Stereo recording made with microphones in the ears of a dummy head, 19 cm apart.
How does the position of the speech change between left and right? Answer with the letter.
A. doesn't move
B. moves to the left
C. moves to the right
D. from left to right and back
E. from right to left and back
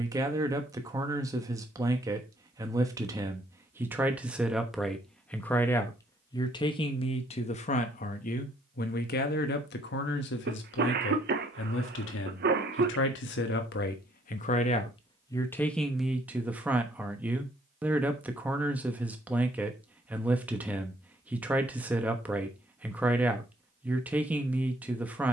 E.